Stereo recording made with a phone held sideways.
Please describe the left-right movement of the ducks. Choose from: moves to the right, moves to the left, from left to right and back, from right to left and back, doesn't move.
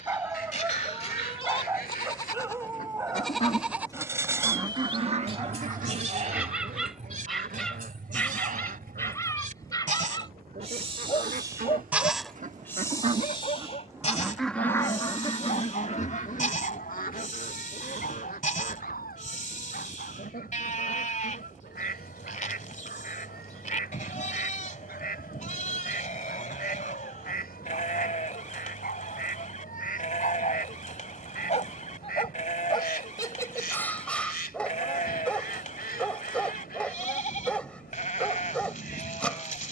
from left to right and back.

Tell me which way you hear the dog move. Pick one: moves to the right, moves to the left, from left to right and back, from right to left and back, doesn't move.
from right to left and back.